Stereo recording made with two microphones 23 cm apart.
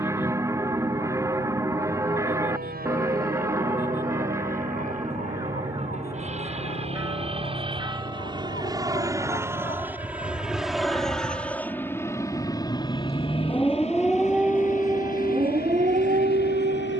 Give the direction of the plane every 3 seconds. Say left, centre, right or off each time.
right, right, right, centre, left, left.